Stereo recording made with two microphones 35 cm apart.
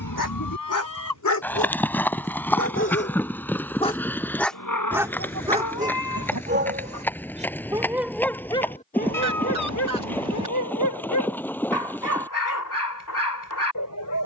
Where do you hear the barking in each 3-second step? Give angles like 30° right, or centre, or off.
50° left, centre, 10° right, 50° left, 60° left.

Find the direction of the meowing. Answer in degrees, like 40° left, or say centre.
70° left.